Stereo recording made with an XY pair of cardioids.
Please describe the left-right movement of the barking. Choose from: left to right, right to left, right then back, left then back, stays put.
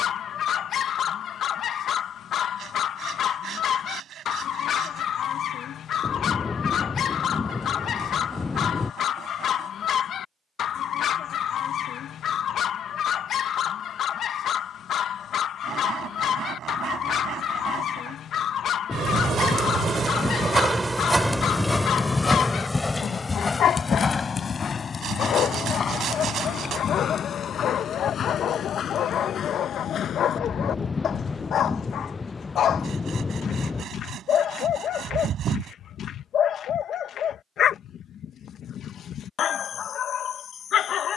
stays put.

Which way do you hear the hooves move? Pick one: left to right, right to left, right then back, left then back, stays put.
right to left.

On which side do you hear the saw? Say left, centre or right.
right.